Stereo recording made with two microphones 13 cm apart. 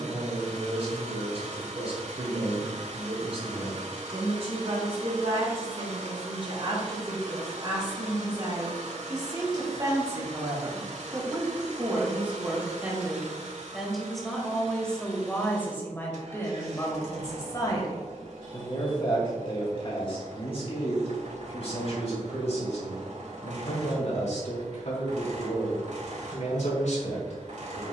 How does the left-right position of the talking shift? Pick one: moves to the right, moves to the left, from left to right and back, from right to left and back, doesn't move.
moves to the left.